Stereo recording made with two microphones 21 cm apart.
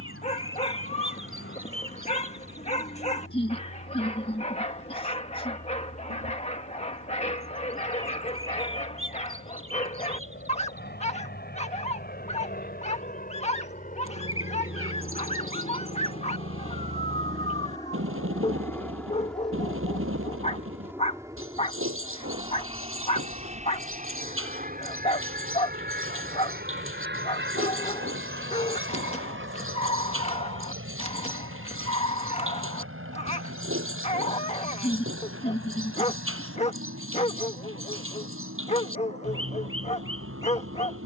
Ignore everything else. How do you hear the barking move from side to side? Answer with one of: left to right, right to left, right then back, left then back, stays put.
stays put.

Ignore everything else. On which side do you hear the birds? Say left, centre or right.
right.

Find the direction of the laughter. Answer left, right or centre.
left.